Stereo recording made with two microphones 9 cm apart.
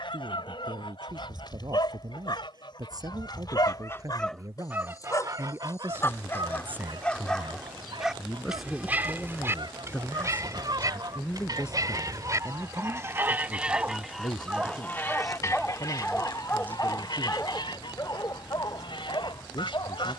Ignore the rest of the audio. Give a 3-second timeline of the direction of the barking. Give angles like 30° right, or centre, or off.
60° left, 50° left, 10° left, 40° right, 30° right, 20° left, 50° left.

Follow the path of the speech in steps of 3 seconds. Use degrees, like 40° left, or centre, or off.
50° right, 40° right, 10° right, 20° left, 50° left, 60° left, 70° left.